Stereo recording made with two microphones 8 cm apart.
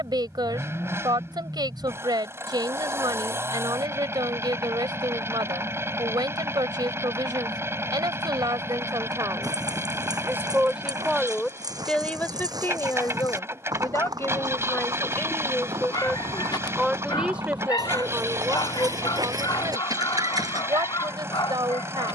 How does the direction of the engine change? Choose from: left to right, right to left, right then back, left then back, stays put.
stays put.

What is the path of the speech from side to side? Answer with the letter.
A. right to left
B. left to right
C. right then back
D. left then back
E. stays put
D.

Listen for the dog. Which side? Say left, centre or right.
left.